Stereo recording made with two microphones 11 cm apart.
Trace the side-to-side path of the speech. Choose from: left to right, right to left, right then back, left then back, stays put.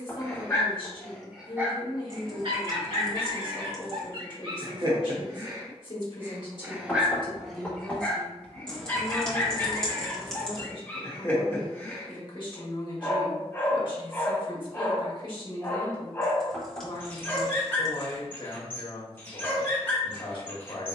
stays put.